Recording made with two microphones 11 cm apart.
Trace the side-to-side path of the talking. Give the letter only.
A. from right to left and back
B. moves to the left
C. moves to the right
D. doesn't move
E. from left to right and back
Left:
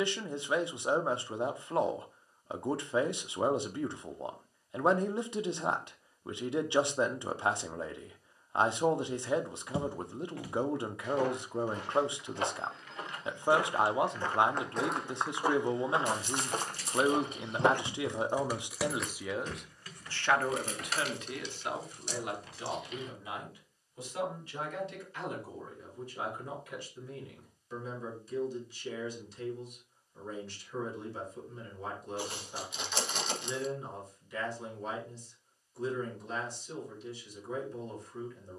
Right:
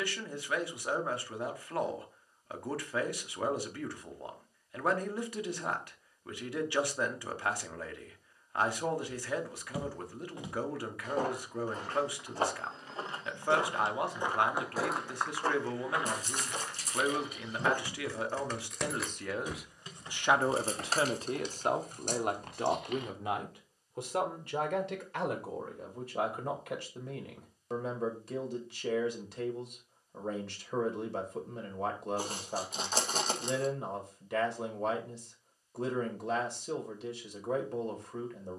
C.